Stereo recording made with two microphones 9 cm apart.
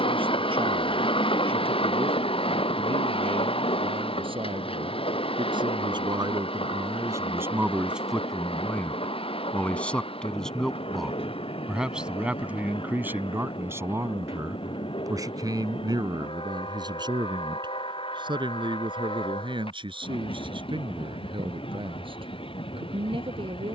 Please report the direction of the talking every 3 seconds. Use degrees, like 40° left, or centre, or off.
80° right, 70° right, 20° right, centre, 20° right, 50° right, 60° right, 70° right.